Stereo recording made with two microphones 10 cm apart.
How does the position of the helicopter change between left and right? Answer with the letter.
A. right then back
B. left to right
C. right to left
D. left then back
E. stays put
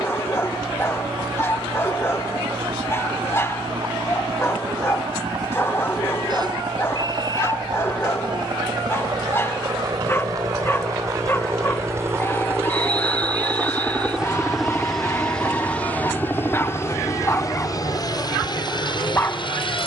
C.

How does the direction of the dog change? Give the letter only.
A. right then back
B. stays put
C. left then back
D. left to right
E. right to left
B.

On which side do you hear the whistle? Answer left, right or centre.
right.